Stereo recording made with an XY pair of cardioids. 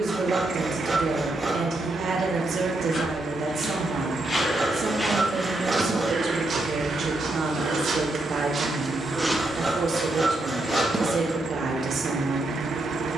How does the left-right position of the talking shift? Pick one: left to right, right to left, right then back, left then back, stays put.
stays put.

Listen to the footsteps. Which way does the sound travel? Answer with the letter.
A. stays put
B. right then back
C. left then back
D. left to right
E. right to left
B.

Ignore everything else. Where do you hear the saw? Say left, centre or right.
right.